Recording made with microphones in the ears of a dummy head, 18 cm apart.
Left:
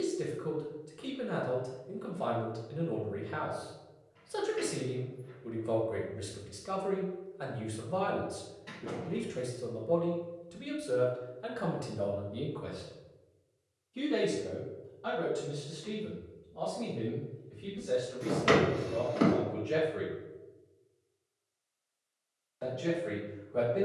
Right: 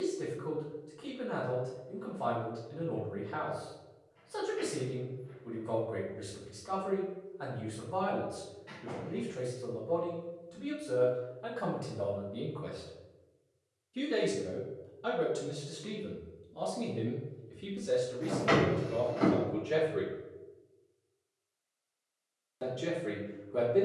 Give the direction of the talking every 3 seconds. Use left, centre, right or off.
left, left, left, left, centre, right, right, right.